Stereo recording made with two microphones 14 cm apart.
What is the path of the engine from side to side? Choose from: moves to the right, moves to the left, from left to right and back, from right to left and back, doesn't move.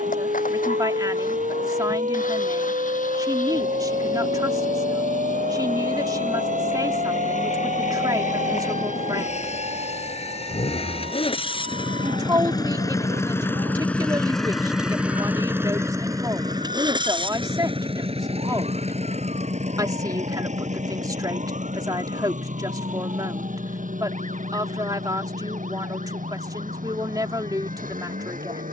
moves to the right.